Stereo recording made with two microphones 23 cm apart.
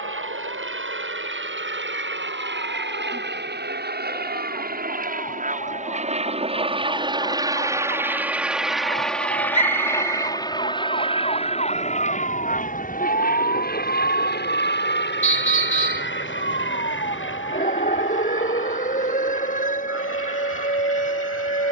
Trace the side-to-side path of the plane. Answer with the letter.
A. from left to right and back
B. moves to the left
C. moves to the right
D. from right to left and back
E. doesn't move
B.